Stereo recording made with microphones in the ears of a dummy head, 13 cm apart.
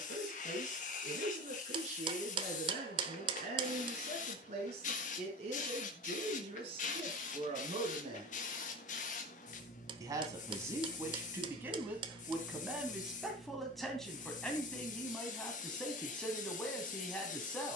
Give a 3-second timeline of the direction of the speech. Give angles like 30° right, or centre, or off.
60° right, 50° right, 40° right, 20° right, centre, 10° left.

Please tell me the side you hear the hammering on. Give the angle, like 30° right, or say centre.
40° right.